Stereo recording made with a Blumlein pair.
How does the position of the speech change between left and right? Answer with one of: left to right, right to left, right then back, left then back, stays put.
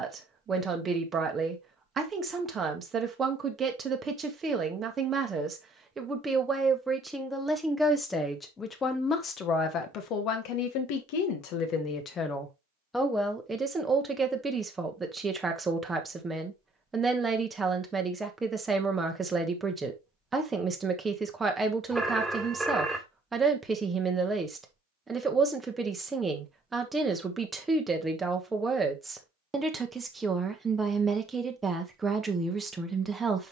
left then back.